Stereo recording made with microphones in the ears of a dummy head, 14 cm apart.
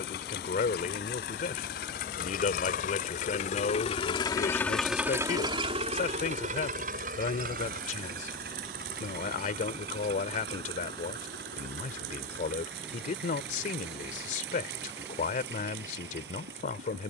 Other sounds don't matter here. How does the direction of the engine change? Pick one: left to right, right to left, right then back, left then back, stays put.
left to right.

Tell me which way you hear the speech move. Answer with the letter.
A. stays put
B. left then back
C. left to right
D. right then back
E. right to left
A.